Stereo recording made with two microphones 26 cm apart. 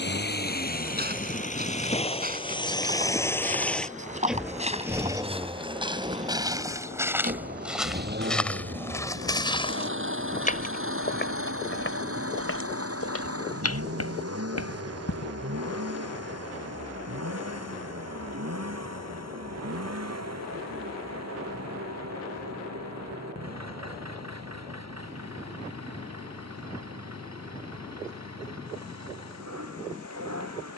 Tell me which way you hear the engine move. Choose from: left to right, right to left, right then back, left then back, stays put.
left to right.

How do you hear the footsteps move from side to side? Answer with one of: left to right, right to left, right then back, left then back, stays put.
right to left.